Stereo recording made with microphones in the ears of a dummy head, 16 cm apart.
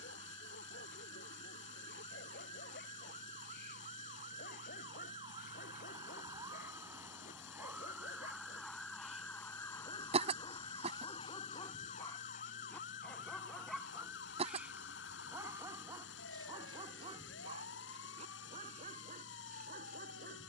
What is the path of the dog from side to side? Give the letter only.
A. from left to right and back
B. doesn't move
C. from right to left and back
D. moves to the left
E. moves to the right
E.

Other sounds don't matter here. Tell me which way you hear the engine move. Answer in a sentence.
You can hear the engine stay put.